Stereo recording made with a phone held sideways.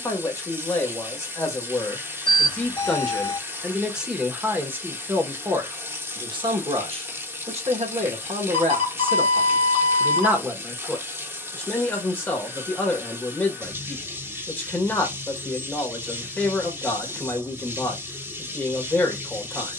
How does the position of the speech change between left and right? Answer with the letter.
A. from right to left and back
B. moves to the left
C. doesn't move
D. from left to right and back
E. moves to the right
D.